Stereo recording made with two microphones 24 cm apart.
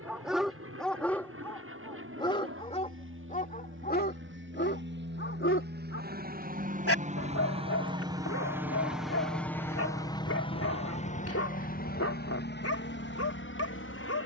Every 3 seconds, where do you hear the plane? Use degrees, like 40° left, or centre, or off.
70° right, 60° right, 20° right, 20° left, 50° left.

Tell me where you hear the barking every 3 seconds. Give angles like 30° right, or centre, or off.
10° left, 50° left, 70° left, 70° left, 70° left.